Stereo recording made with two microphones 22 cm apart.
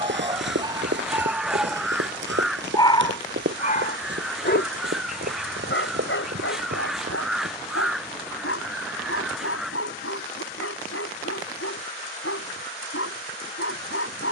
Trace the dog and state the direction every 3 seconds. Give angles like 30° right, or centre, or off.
10° right, 50° left, 70° left, 80° left, 80° left.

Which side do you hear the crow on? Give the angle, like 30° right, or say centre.
centre.